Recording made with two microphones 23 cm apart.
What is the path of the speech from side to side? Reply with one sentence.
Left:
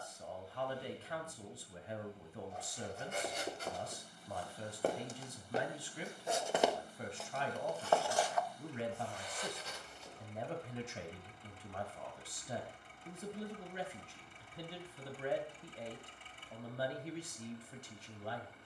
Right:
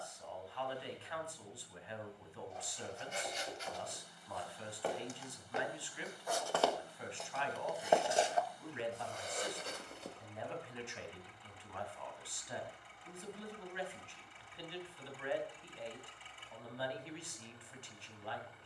In this clip you hear the speech stay in one place.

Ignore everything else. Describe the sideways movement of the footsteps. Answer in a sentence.
You can hear the footsteps move to the right.